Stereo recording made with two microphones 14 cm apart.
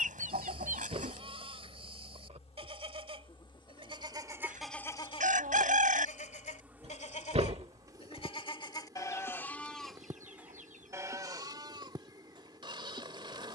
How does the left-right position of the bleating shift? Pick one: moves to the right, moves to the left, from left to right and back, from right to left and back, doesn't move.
from right to left and back.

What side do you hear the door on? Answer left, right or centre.
right.